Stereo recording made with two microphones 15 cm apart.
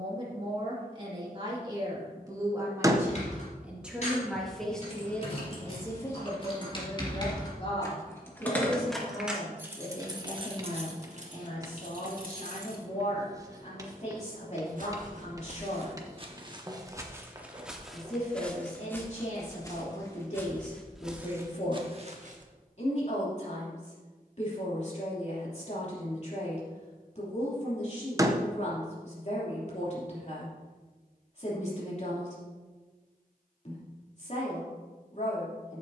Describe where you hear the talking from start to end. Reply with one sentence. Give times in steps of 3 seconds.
You can hear the talking on the right from 0 s, in the centre from 3 s and on the left from 6 s.